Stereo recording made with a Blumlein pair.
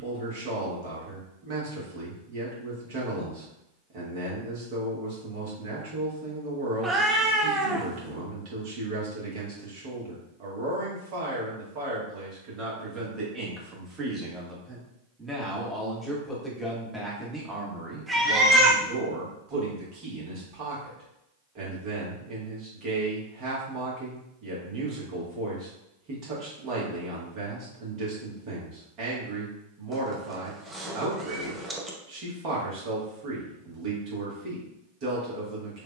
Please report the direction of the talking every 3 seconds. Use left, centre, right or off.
right, right, right, right, right, centre, right, right, right, right, right, right.